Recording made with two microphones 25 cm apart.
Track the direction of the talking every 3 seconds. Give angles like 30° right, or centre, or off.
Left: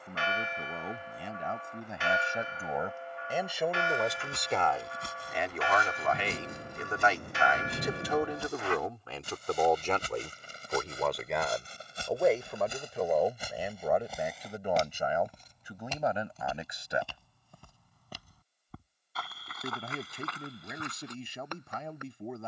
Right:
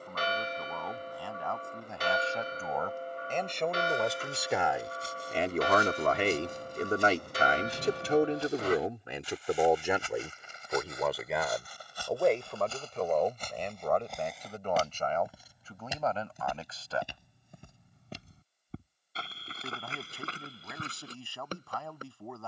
20° left, 20° right, 40° right, 10° right, 10° left, 20° left, 20° left, 20° left.